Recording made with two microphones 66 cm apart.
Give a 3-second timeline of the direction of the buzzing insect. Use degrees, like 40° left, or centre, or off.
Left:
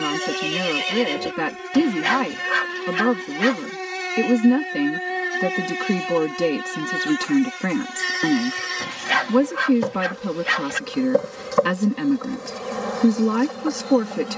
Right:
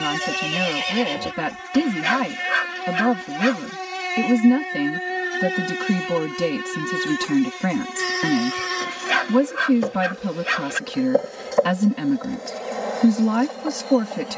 30° right, centre, 20° left, 30° left, 40° left.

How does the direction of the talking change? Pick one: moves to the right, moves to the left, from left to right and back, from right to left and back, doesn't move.
doesn't move.